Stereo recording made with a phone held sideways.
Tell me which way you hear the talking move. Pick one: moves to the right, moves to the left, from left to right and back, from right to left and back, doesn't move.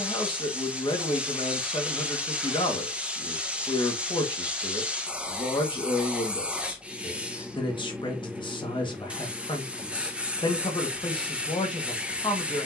doesn't move.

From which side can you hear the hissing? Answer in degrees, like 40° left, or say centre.
10° right.